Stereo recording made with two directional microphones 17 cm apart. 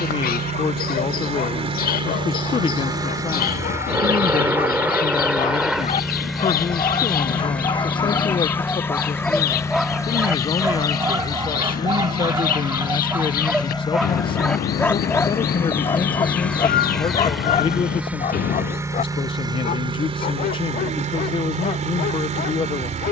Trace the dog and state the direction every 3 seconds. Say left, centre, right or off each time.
left, left, left, centre, centre, left, left, left.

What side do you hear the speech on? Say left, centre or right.
left.